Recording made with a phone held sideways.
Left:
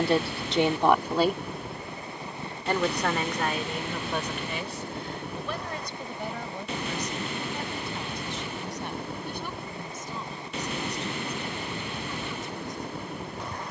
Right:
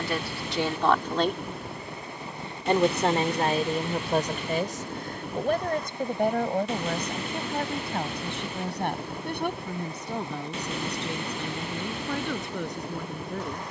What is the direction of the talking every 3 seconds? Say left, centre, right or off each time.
centre, right, right, right, right.